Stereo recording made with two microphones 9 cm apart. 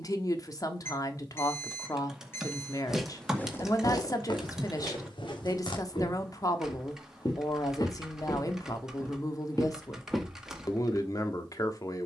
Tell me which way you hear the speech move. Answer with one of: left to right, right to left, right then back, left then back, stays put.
stays put.